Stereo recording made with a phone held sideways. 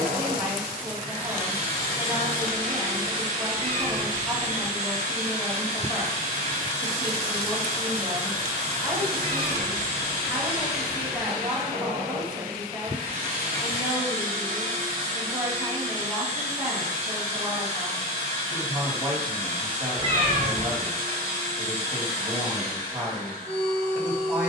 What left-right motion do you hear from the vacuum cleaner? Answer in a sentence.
In this clip you hear the vacuum cleaner stay in one place.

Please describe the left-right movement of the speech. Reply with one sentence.
You can hear the speech stay put.